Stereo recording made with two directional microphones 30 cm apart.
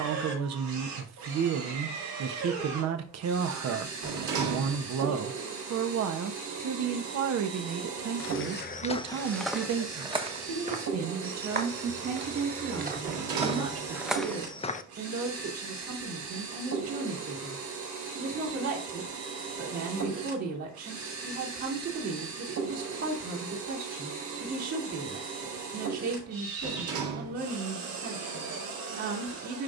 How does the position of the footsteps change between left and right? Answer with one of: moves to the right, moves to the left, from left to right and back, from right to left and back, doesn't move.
from left to right and back.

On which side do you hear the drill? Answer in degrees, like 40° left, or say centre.
70° right.